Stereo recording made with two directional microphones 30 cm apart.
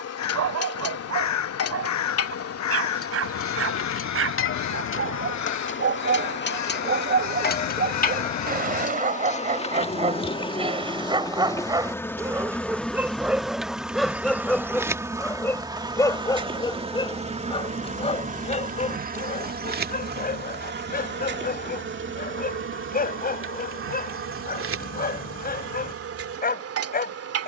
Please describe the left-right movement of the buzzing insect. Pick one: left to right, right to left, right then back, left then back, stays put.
left to right.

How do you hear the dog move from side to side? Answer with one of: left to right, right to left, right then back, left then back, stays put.
right to left.